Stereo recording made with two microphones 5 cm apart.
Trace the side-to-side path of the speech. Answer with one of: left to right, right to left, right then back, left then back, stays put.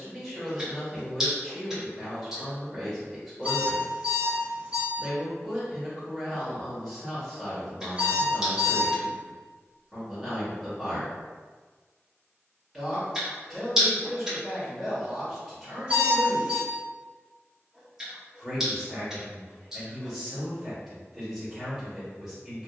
stays put.